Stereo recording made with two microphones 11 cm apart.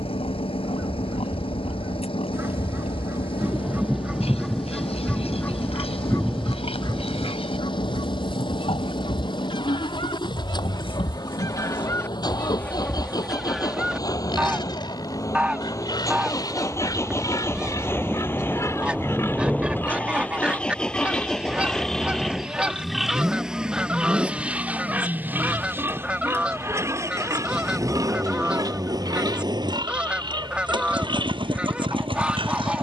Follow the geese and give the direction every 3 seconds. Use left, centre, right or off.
right, centre, left, left, centre, centre, centre, centre, centre, centre, centre.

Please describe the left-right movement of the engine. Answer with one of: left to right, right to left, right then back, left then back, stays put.
left to right.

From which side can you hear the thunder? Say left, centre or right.
centre.